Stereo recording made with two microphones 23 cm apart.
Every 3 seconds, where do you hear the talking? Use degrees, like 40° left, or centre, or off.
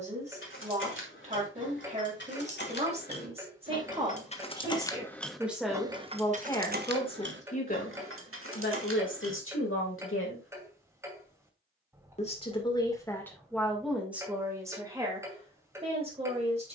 30° right, 20° right, 30° left, 60° left, centre, 30° right.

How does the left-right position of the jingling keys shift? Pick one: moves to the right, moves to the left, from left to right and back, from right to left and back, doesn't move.
moves to the right.